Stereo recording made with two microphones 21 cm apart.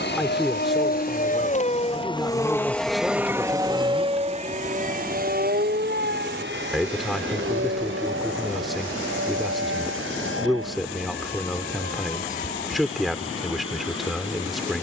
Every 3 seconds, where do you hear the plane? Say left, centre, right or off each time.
left, right, right, right, right.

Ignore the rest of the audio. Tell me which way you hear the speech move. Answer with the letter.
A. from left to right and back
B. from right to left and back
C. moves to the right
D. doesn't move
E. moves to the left
D.